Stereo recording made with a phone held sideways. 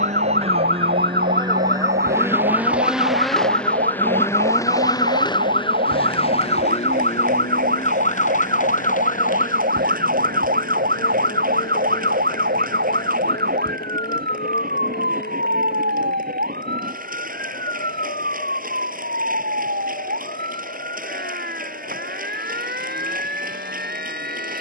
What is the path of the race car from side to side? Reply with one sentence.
You can hear the race car go from the right side to the left.